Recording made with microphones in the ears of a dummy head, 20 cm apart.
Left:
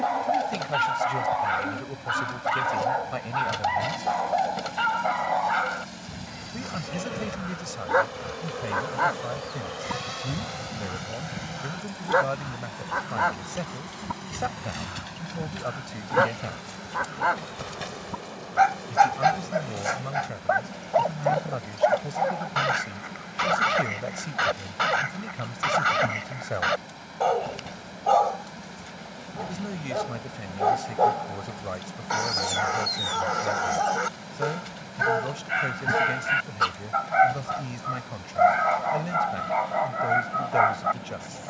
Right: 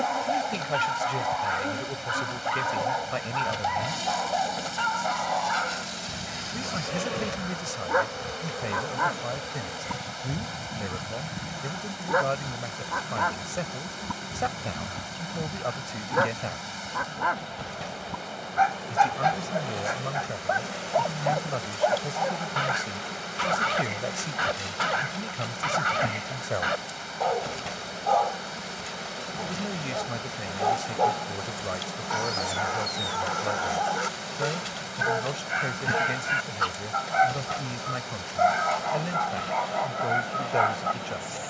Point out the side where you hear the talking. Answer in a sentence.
In this clip you hear the talking in the centre.